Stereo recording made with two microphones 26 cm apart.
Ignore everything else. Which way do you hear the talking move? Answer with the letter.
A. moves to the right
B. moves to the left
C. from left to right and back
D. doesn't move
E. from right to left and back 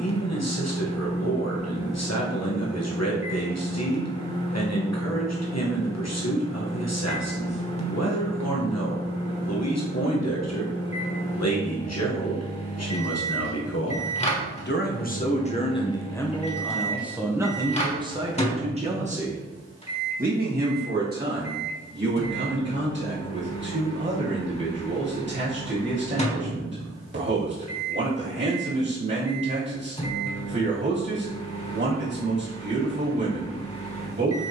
A.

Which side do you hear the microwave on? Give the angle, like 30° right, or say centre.
20° left.